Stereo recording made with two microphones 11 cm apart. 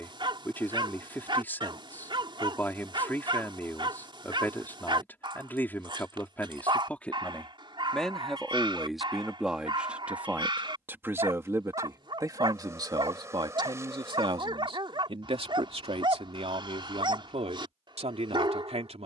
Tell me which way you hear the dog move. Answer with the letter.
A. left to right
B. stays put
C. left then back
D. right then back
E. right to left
B.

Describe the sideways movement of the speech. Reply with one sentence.
You can hear the speech move to the right.